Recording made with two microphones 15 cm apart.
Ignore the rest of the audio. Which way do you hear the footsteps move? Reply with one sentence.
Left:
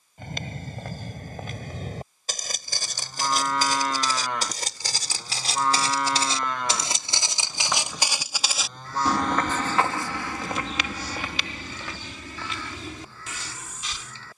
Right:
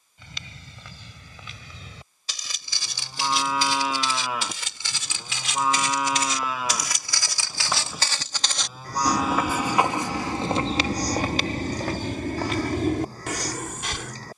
You can hear the footsteps go from the left side to the right.